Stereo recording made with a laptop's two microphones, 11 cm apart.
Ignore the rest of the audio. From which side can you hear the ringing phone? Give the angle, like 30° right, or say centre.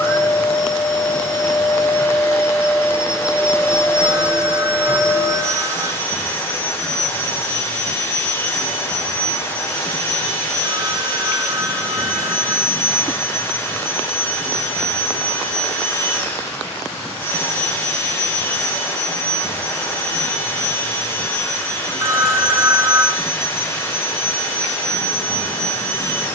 30° right.